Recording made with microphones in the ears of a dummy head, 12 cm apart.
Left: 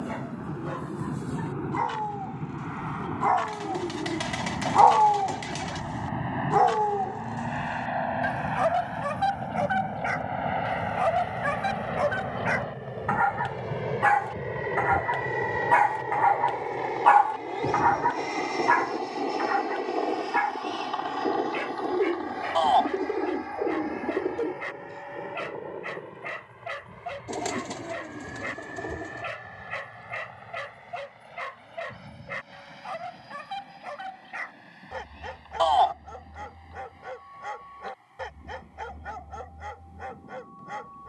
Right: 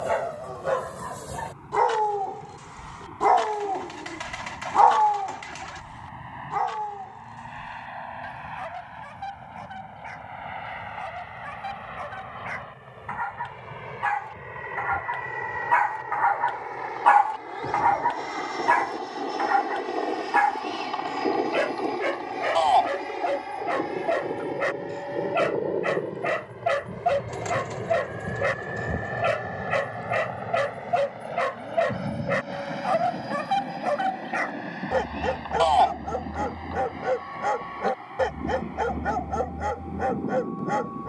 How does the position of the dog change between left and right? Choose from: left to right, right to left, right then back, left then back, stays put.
left then back.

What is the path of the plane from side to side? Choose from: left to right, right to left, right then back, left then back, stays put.
left to right.